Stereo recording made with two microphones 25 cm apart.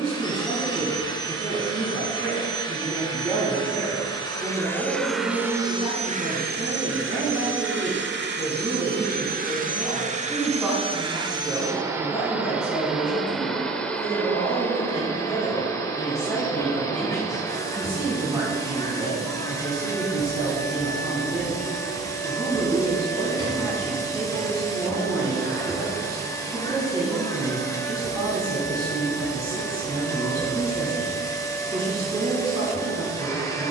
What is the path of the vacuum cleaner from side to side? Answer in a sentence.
You can hear the vacuum cleaner move from left to right and back again.